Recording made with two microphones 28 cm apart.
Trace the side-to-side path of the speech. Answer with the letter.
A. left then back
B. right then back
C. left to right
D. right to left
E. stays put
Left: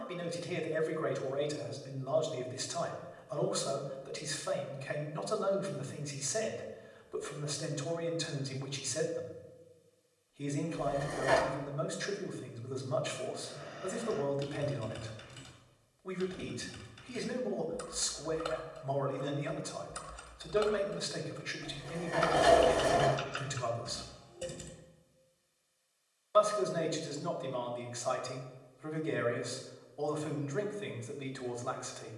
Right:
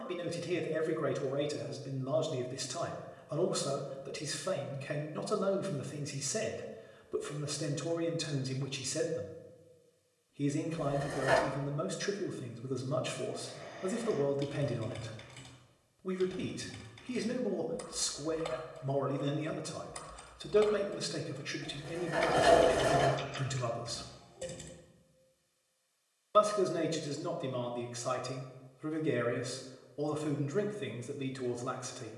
E.